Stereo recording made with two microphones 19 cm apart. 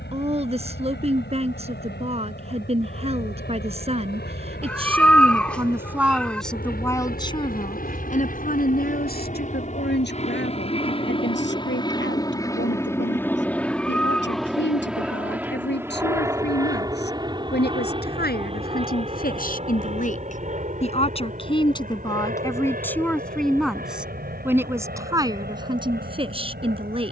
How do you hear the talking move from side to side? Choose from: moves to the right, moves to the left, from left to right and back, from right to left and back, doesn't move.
from right to left and back.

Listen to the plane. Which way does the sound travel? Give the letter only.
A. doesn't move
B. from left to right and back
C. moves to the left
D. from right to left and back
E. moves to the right
E.